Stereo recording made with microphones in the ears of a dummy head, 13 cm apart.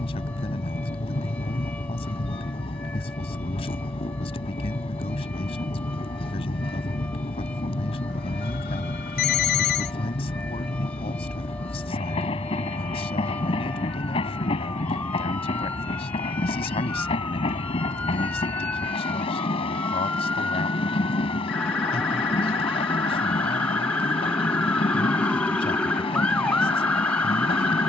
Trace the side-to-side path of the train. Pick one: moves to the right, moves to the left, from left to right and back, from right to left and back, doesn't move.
doesn't move.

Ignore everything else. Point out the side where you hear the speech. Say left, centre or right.
left.